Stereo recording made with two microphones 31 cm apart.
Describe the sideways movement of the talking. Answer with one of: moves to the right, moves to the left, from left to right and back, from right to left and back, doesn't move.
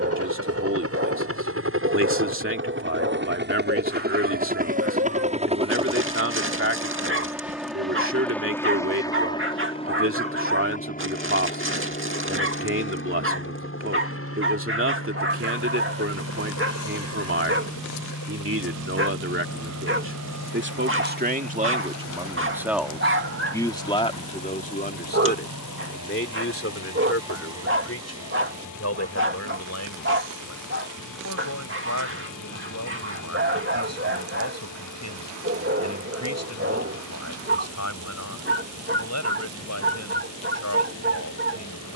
moves to the left.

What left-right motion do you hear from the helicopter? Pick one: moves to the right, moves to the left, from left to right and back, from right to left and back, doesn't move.
moves to the left.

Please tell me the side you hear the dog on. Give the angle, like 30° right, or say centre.
40° right.